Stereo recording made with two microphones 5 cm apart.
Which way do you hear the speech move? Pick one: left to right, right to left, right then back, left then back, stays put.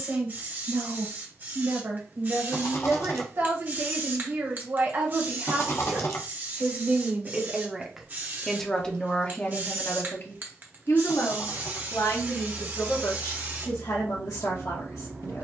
right to left.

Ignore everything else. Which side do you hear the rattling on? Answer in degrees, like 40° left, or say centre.
50° left.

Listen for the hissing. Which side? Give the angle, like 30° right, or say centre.
30° right.